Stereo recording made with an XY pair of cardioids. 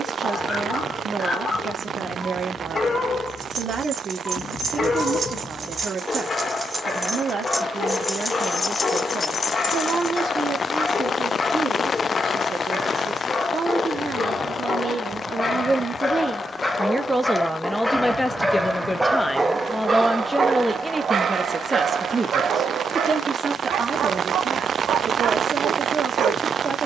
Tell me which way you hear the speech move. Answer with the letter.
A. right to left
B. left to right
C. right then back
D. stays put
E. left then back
E.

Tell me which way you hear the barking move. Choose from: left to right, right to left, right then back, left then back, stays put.
left to right.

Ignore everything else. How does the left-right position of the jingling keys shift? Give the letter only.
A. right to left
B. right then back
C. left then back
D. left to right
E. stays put
A.